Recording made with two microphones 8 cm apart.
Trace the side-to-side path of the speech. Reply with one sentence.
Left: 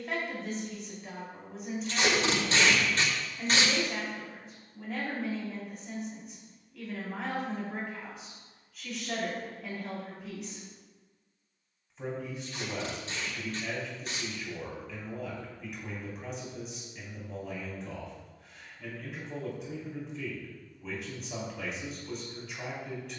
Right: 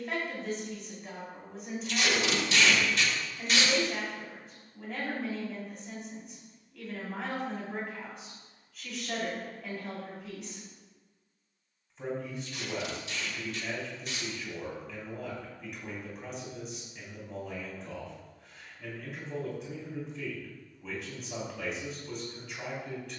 You can hear the speech stay in one place.